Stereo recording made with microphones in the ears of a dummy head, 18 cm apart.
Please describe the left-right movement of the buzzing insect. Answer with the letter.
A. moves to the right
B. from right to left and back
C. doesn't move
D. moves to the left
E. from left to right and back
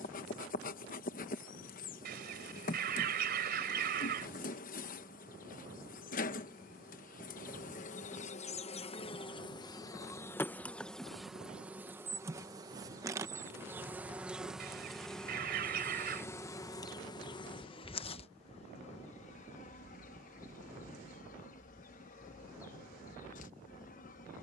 E.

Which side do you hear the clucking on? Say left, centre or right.
right.